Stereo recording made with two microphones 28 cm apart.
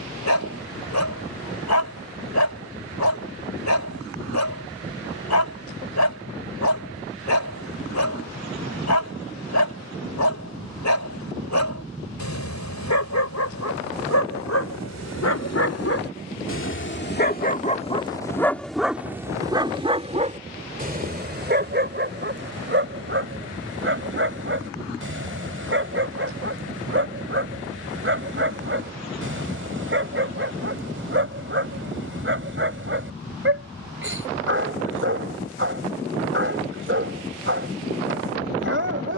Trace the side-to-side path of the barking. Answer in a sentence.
In this clip you hear the barking go from the left side to the right.